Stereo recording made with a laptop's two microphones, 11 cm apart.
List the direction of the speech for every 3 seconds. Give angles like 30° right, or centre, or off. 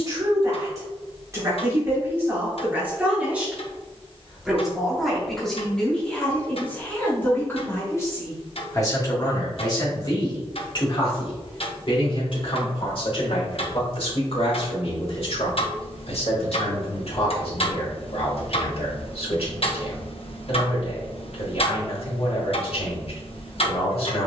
20° right, centre, 20° left, 40° left, 60° left, 70° left, 70° left, 70° left.